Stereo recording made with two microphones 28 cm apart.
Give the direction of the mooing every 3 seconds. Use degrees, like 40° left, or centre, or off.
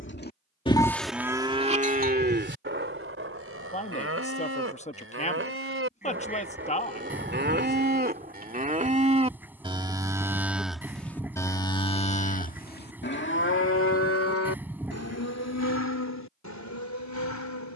10° right, 50° right, 40° right, centre, 40° left, 70° left.